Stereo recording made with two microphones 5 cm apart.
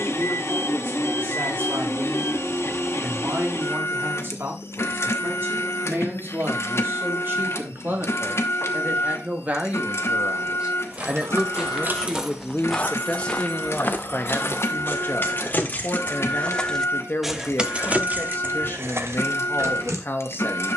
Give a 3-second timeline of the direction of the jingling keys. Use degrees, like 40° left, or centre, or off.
off, off, off, 60° right, 40° left, 20° left, 60° right.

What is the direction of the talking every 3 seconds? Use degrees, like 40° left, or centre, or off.
50° right, 50° right, 40° right, 20° right, 30° left, 50° left, 50° left.